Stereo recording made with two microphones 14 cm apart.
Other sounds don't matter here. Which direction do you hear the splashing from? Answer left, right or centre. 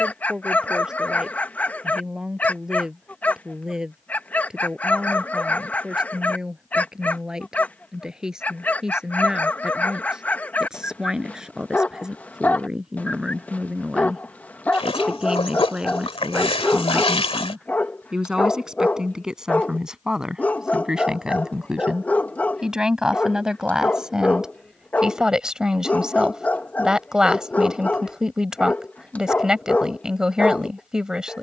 left.